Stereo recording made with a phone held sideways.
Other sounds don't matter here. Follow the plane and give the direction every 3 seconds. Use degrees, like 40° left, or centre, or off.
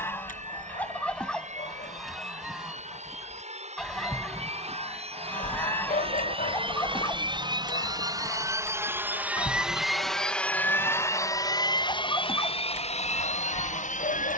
60° right, 50° right, 30° right, 10° left, 40° left.